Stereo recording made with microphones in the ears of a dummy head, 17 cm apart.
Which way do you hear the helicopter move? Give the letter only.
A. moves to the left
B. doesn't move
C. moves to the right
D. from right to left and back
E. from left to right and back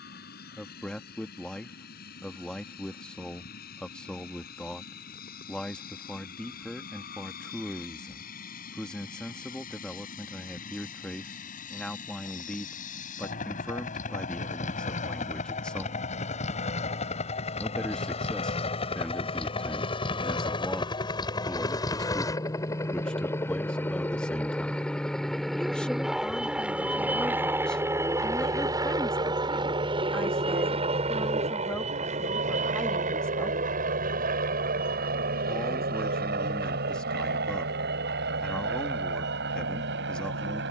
C.